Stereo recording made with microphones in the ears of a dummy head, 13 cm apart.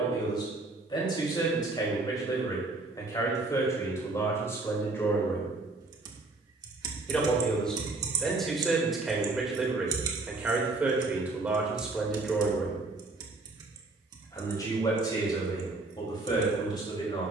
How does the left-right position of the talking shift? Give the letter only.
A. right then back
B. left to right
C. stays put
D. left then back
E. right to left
A.